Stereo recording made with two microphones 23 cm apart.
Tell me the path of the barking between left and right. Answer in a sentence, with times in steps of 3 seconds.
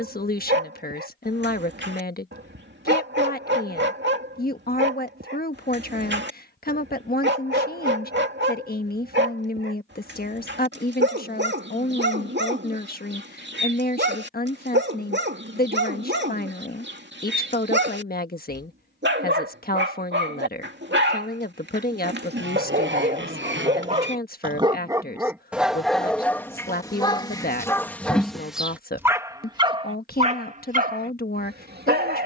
In this clip you hear the barking on the right from 0 s, in the centre from 24 s and on the right from 30 s.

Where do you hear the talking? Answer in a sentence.
You can hear the talking on the left.